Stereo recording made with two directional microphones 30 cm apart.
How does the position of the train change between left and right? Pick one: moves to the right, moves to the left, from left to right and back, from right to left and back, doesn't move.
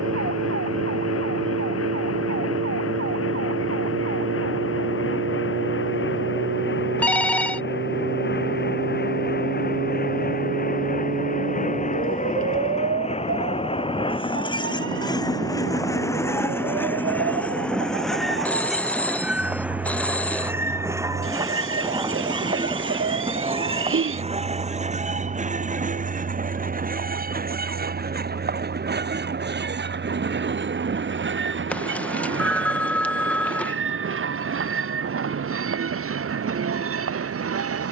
moves to the right.